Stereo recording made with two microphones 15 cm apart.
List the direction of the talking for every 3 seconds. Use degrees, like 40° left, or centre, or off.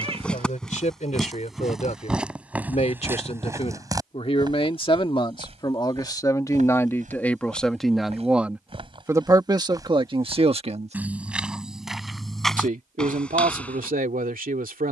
50° left, 40° left, 10° left, 30° right, 70° right.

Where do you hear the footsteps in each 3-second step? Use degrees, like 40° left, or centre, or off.
centre, 30° right, 50° right, 10° right, 10° left.